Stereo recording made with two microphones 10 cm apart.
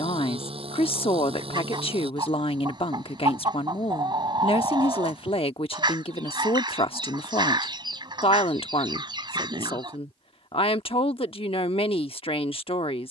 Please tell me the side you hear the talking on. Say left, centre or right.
left.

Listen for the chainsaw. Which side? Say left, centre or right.
right.